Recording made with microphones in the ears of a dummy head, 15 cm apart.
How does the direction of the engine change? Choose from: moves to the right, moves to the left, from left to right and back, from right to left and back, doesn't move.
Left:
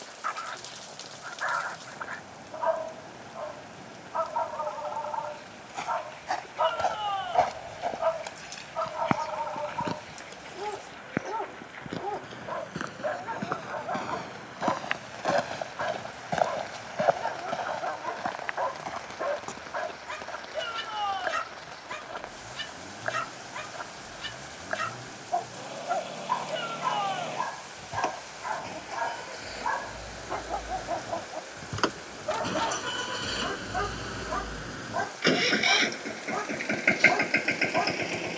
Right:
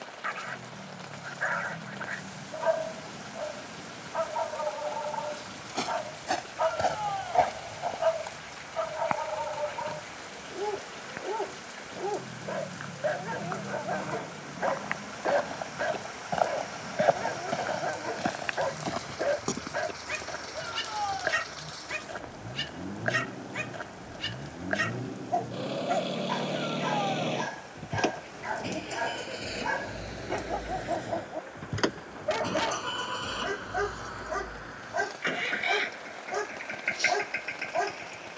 moves to the left.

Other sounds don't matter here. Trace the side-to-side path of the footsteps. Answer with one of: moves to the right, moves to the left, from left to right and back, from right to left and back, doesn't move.
from right to left and back.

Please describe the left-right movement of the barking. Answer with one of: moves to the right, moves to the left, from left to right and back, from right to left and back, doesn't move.
doesn't move.